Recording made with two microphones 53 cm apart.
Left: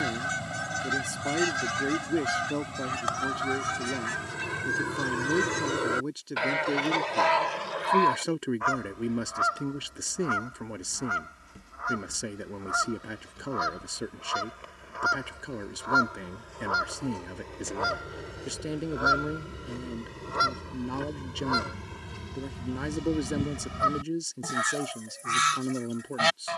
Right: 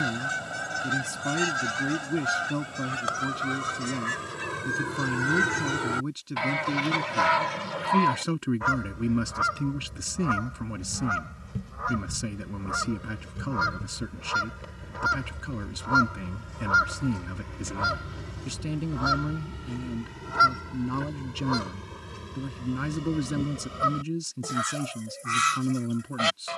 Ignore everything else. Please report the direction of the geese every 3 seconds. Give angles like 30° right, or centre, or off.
20° left, centre, 40° right, 70° right, 70° right, 40° right, 20° right, 10° left, 20° left.